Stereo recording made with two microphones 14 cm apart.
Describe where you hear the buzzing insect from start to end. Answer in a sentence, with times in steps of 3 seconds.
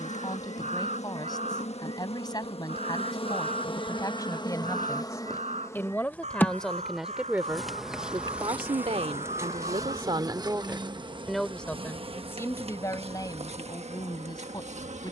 You can hear the buzzing insect on the left from 0 s, in the centre from 6 s and on the right from 9 s.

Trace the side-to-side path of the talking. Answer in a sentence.
In this clip you hear the talking move from left to right and back again.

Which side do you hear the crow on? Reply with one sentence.
In this clip you hear the crow on the right.